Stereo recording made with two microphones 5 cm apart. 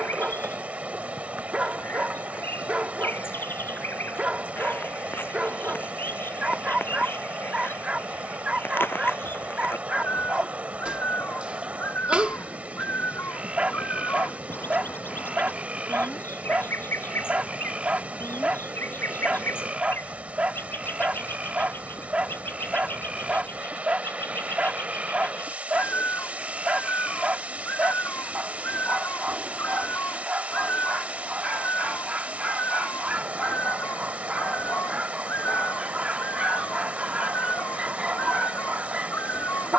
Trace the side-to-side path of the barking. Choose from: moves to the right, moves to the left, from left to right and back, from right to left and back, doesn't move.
doesn't move.